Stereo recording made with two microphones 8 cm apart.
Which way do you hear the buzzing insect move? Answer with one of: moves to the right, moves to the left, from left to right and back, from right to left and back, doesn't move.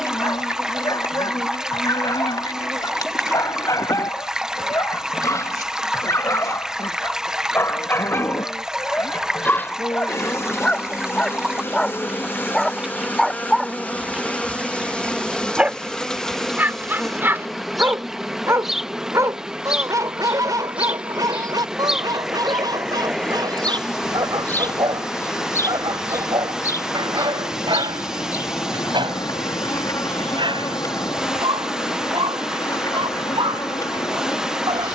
from left to right and back.